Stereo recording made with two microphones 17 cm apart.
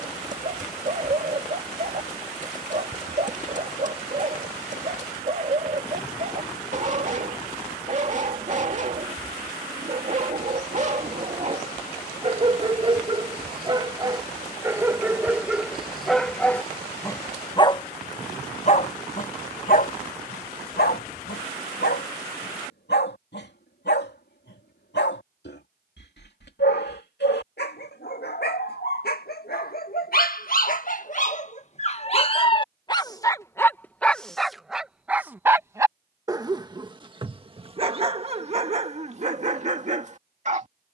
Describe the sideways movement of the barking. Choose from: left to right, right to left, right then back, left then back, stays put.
left then back.